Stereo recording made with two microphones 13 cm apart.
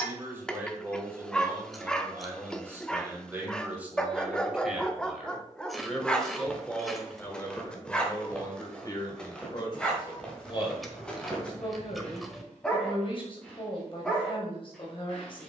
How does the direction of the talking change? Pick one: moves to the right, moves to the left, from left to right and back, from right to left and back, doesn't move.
moves to the left.